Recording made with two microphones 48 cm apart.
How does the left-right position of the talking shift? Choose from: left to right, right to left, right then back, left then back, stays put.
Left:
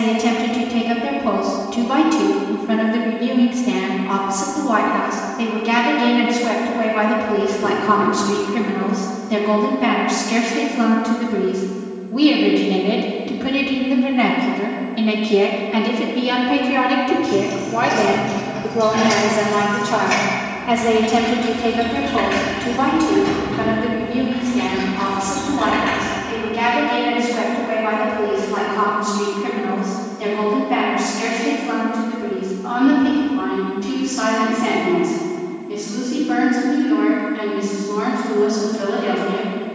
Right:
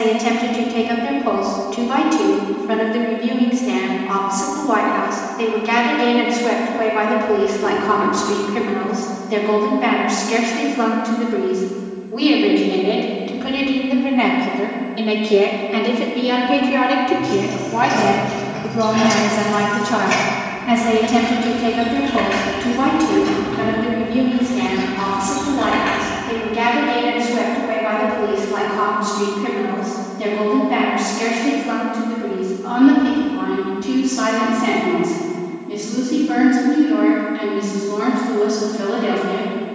left to right.